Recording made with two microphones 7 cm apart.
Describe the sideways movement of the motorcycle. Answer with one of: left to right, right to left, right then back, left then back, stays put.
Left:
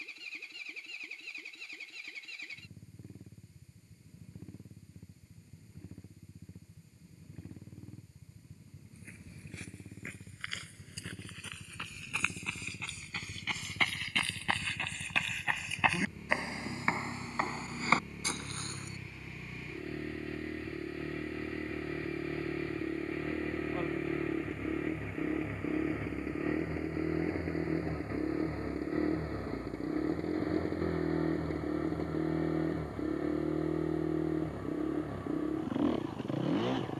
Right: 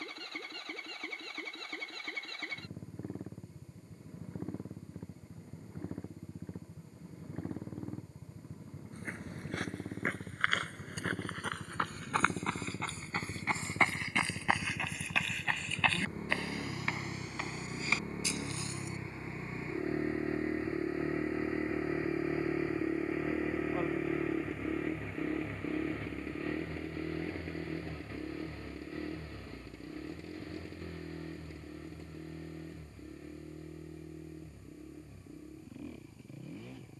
right to left.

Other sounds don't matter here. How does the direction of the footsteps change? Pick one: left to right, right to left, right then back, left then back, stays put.
right to left.